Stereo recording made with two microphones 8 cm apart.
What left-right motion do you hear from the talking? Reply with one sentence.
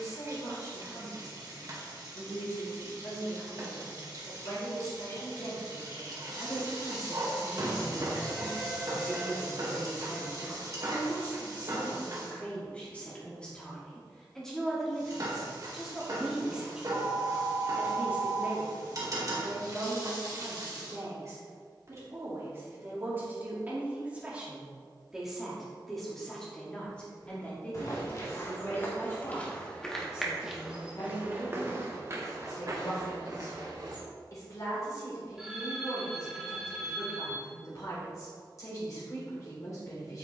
You can hear the talking go right and come back.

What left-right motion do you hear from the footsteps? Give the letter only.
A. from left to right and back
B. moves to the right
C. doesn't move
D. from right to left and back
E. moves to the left
B.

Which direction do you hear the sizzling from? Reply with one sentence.
In this clip you hear the sizzling on the right.